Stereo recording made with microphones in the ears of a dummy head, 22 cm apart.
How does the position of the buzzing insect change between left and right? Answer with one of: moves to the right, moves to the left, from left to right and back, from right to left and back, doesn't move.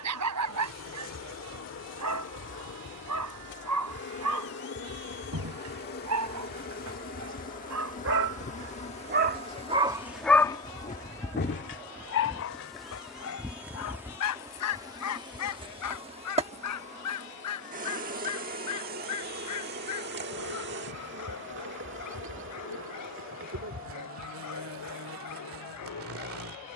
moves to the right.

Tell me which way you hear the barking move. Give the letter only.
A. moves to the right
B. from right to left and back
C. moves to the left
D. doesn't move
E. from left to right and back
C.